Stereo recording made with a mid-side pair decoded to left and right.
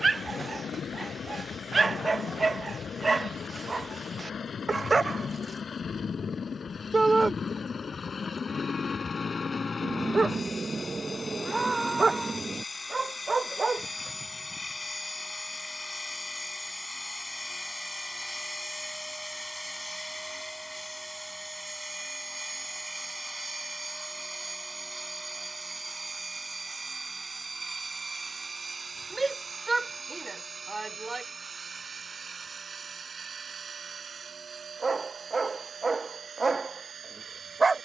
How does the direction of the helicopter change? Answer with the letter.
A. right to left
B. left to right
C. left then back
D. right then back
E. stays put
B.